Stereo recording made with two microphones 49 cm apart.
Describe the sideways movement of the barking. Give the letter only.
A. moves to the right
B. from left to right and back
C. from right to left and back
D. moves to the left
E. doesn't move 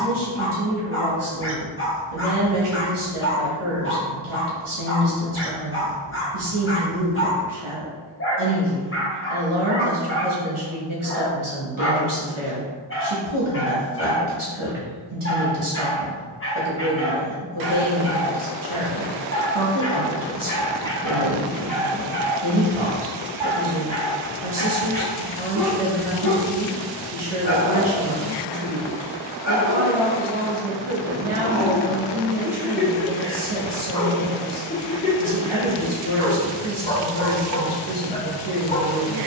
B.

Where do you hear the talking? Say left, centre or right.
right.